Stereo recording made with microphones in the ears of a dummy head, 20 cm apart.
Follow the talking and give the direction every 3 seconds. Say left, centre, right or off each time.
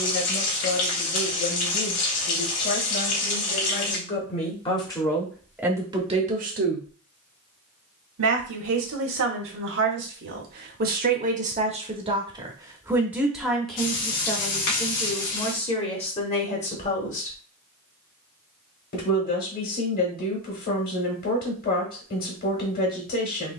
left, left, right, right, centre, left, left, left.